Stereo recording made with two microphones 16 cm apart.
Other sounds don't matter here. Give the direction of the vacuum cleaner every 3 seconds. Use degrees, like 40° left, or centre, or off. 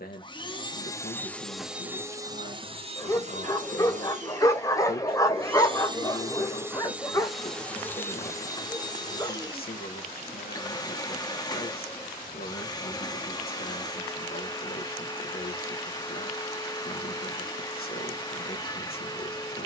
centre, 40° right, centre, 30° left, 30° left, 30° left, 30° left.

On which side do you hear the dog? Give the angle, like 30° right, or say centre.
20° left.